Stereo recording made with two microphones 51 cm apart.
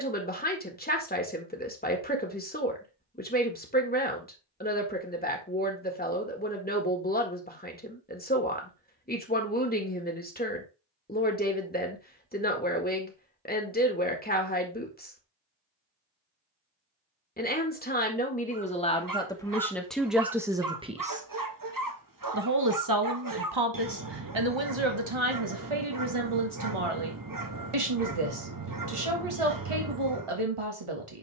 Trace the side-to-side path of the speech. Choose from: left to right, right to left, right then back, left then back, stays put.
left to right.